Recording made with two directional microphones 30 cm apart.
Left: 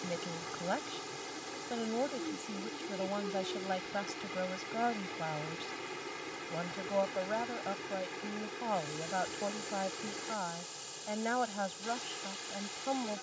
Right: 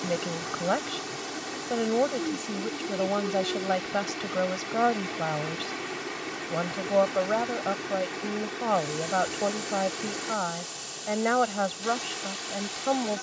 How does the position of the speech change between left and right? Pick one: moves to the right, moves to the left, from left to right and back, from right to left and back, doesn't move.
doesn't move.